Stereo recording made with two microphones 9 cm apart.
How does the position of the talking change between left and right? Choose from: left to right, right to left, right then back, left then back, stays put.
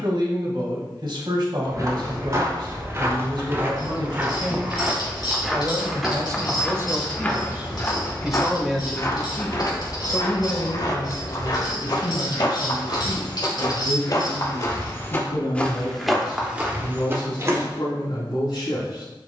right to left.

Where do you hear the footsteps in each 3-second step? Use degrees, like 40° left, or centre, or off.
40° right, 20° right, 20° left, 50° left, 50° left, 10° right, off.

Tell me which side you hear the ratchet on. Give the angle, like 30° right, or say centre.
60° left.